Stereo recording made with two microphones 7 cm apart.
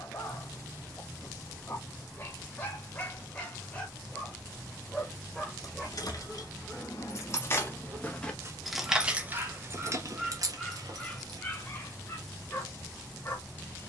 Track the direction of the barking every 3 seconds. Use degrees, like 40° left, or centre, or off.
30° left, 10° left, 20° right, centre, 30° left.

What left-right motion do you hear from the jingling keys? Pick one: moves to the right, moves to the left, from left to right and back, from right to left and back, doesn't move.
moves to the right.